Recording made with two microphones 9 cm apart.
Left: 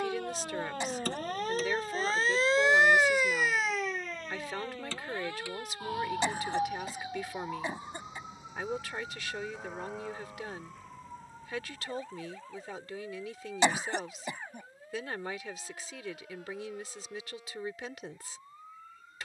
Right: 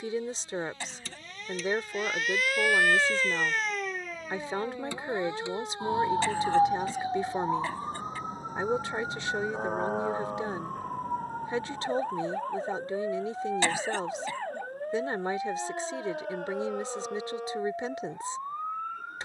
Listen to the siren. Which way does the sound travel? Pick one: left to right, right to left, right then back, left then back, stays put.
left to right.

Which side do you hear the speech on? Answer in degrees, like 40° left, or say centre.
30° right.